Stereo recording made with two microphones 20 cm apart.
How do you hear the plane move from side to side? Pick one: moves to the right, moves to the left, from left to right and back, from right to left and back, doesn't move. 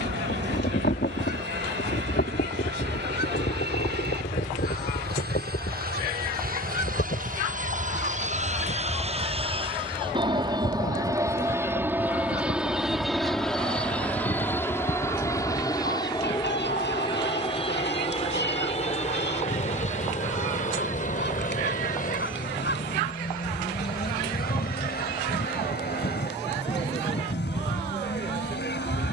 moves to the left.